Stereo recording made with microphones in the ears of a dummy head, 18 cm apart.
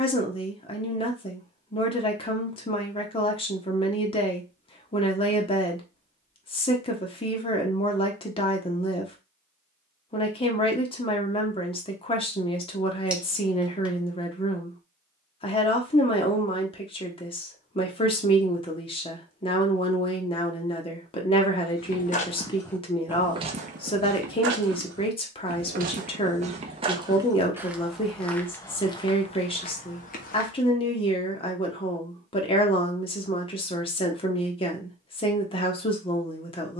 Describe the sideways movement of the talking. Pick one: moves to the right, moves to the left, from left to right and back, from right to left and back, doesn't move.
doesn't move.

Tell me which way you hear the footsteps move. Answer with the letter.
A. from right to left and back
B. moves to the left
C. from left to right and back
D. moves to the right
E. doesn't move
C.